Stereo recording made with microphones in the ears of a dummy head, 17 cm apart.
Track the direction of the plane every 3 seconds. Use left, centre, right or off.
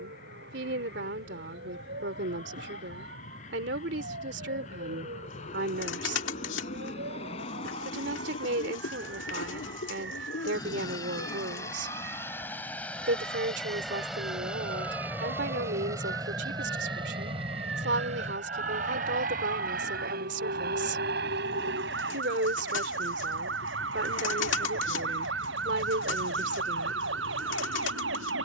left, left, left, left, centre, right, right, right, right, right.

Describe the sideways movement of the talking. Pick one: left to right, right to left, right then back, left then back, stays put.
stays put.